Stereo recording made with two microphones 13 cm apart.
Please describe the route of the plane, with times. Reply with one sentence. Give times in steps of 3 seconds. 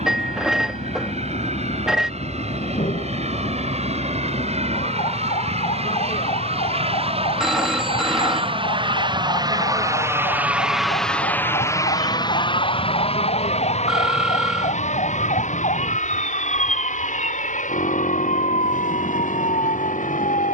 In this clip you hear the plane on the right from 0 s, in the centre from 9 s and on the left from 12 s.